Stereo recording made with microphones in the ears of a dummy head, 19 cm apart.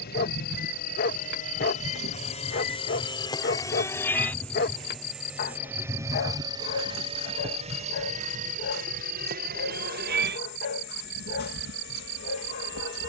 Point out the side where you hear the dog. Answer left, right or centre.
left.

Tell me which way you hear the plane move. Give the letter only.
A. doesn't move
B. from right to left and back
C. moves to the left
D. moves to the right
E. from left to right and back
D.